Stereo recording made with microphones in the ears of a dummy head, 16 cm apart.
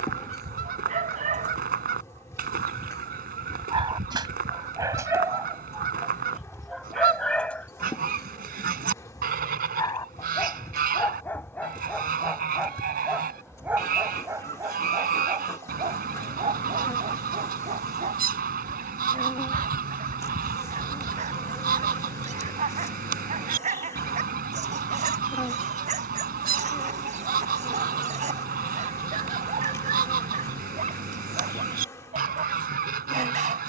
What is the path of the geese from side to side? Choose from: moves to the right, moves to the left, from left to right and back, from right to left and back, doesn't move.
doesn't move.